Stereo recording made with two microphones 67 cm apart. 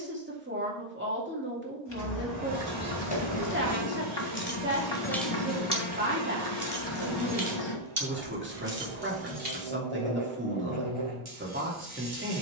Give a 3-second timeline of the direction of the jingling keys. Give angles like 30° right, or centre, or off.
40° left, 10° left, 40° right, 60° right.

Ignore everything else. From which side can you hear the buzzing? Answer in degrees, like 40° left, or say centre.
50° right.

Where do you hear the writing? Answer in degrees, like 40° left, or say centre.
40° left.